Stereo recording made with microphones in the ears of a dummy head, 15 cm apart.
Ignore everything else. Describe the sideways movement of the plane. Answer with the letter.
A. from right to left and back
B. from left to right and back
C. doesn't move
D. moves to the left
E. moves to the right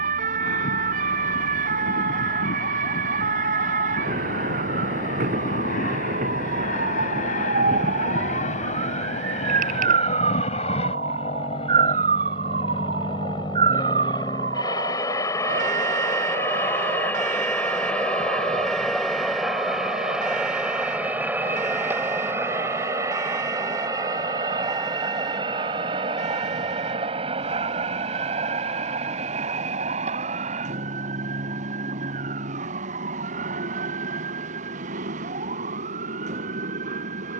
E.